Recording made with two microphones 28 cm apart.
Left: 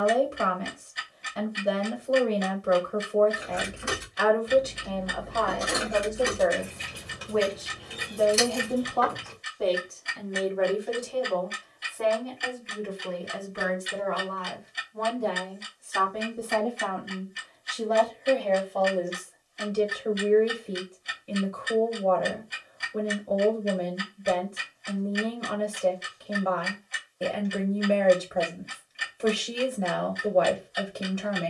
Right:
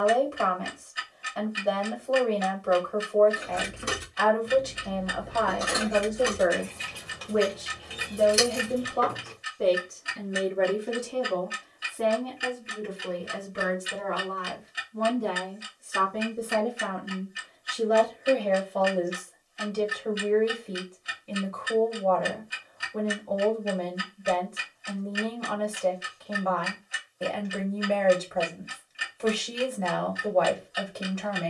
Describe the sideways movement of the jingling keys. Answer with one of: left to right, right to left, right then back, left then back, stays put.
left then back.